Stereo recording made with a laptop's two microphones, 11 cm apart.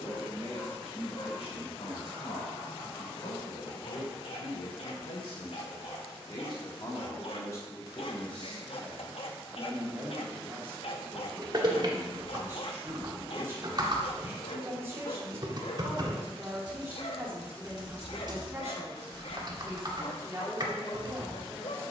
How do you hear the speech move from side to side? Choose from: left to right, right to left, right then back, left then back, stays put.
left to right.